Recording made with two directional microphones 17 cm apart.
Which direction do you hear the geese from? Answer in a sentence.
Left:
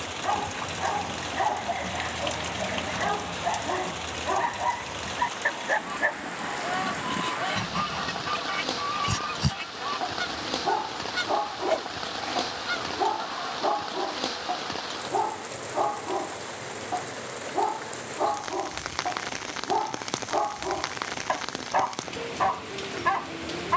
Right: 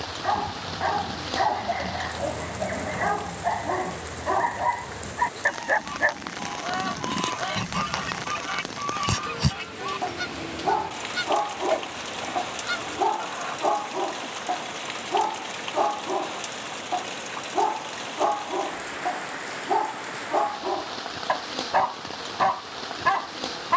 In this clip you hear the geese in the centre.